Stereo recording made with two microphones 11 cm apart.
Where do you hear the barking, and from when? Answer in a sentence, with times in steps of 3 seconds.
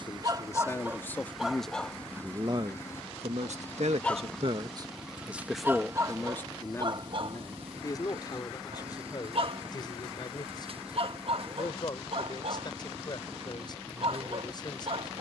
You can hear the barking in the centre from 0 s and on the right from 6 s.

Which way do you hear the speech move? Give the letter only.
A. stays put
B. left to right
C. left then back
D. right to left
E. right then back
E.